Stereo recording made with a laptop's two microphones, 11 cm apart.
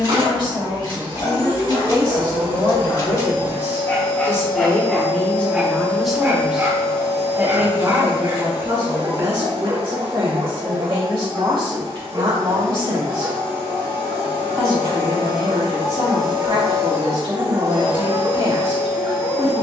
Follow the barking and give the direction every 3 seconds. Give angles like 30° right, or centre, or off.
40° left, 10° left, 40° right, 60° right, 60° right, 60° right, 60° right.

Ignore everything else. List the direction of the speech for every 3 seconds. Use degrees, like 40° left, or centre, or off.
50° left, 20° left, 20° right, 50° right, 70° right, 70° right, 70° right.